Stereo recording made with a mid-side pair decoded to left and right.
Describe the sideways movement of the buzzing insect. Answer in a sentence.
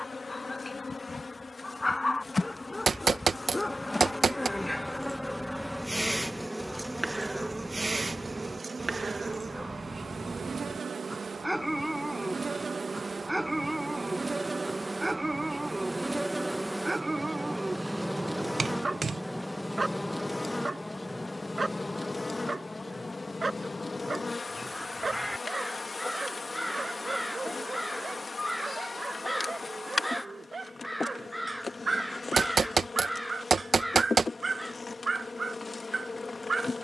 In this clip you hear the buzzing insect move from left to right and back again.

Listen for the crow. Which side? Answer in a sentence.
You can hear the crow in the centre.